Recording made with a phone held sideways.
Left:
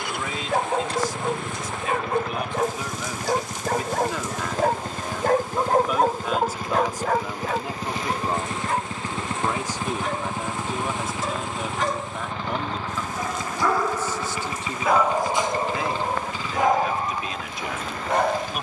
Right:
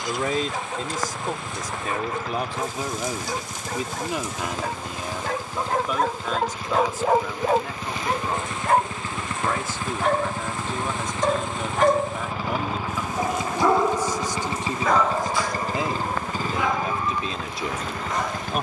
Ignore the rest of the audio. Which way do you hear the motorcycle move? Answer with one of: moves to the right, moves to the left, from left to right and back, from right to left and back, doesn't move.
moves to the right.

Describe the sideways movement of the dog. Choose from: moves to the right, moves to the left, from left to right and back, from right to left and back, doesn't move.
from left to right and back.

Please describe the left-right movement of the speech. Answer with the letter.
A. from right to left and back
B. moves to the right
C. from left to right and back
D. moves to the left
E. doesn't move
A.